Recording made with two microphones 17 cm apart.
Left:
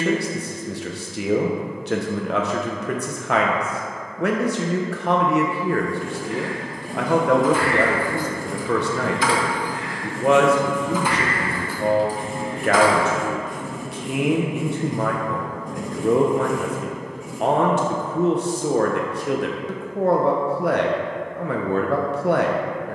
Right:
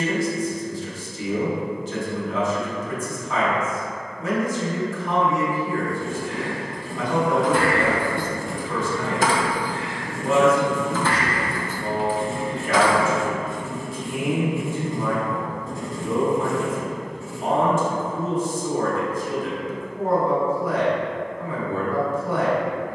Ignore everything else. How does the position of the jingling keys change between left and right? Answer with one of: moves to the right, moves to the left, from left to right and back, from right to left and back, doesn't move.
moves to the left.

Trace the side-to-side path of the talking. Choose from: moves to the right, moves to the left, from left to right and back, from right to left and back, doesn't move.
doesn't move.